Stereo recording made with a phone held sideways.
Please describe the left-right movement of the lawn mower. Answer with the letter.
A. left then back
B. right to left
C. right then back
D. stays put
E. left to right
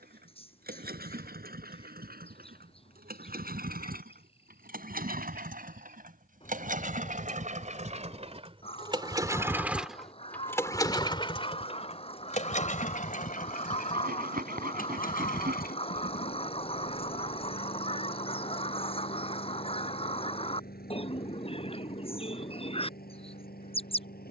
B.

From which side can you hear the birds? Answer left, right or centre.
left.